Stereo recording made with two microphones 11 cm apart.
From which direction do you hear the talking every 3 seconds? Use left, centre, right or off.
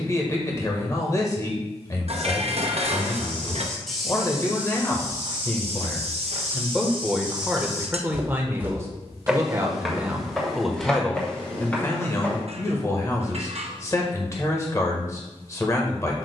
left, left, centre, centre, left, left.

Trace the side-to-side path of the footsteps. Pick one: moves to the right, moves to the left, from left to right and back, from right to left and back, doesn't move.
from left to right and back.